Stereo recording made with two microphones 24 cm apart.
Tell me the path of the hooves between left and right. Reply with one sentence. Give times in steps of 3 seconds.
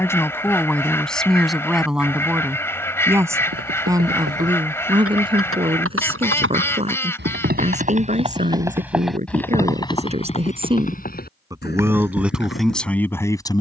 In this clip you hear the hooves not at all from 0 s, on the right from 3 s and on the left from 9 s.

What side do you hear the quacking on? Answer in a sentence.
In this clip you hear the quacking in the centre.